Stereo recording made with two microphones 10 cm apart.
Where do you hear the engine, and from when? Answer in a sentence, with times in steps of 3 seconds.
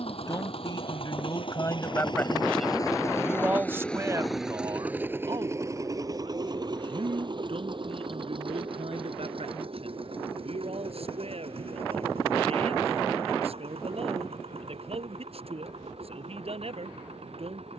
In this clip you hear the engine on the left from 0 s, in the centre from 3 s and on the right from 6 s.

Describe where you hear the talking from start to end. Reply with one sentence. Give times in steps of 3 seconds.
In this clip you hear the talking on the left from 0 s and on the right from 3 s.